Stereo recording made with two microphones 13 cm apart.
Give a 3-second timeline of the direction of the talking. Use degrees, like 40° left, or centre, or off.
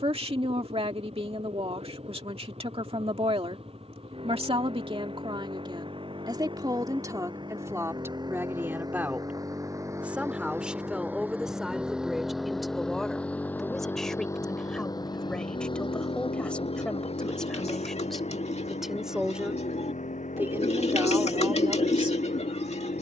50° right, 50° right, 20° right, 10° right, centre, 10° left, 10° right, 30° right.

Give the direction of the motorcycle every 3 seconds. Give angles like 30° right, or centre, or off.
50° right, 50° right, 40° right, 20° right, 10° left, 50° left, 70° left, 80° left.